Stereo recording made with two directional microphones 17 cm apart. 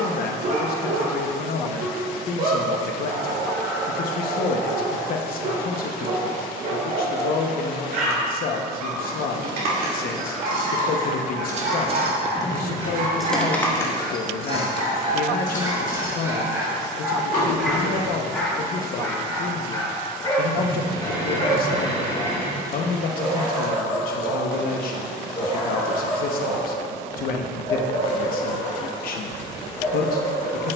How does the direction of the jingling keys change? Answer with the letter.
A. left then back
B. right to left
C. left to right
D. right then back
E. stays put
B.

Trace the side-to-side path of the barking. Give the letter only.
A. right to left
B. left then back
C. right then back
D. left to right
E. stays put
A.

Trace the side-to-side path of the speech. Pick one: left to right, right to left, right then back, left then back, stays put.
stays put.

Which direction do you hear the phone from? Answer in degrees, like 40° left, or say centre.
30° left.